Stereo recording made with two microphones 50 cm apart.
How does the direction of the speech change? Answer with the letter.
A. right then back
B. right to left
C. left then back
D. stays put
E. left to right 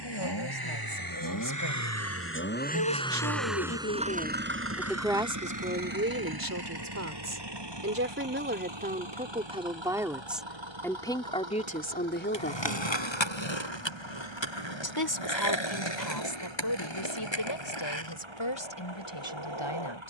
A.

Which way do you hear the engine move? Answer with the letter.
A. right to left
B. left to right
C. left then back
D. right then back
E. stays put
B.